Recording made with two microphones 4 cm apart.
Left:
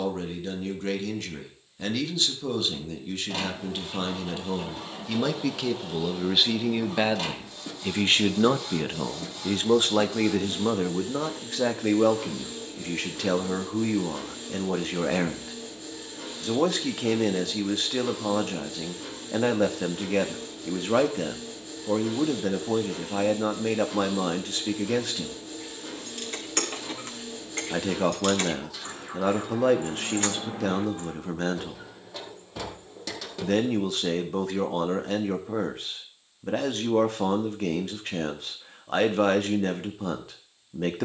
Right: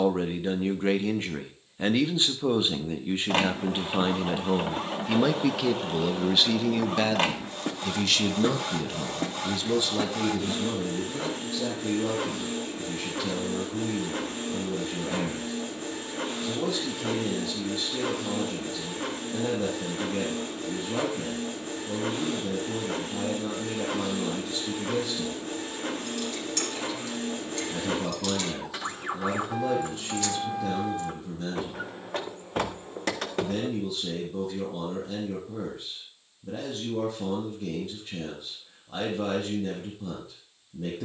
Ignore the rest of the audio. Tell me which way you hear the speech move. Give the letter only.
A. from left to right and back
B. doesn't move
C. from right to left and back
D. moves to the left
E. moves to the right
D.